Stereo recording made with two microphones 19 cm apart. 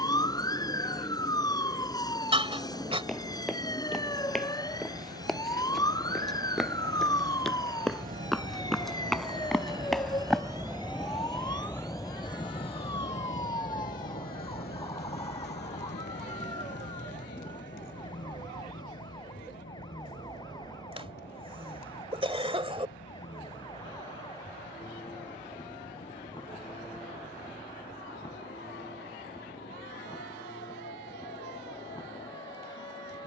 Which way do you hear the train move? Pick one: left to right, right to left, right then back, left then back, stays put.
right to left.